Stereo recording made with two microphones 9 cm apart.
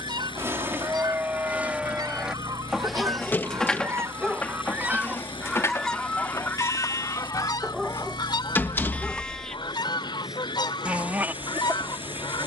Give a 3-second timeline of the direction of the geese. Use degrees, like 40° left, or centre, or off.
50° right, 20° right, 40° left, 60° left.